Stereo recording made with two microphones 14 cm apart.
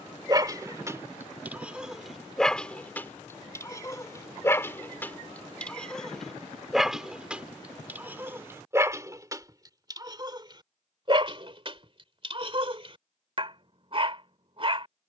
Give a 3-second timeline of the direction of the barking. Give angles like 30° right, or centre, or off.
10° right, 20° left, 10° right, 30° right, 40° right.